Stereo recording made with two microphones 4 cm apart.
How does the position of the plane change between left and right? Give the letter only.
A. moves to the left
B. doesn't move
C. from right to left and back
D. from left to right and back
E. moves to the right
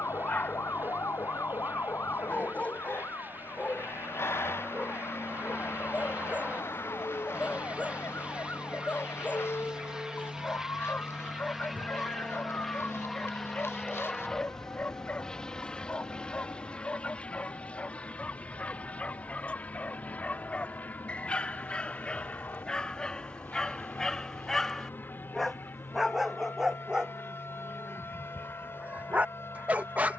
A.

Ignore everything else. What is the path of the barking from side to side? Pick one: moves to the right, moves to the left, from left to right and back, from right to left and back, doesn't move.
moves to the right.